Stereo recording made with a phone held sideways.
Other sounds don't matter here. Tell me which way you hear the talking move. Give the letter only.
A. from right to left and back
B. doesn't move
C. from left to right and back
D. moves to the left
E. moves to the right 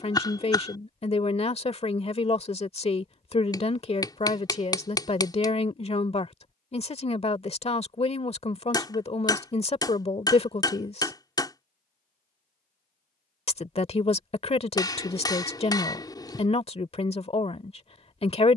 B.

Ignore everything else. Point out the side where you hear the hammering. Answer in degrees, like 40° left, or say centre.
20° left.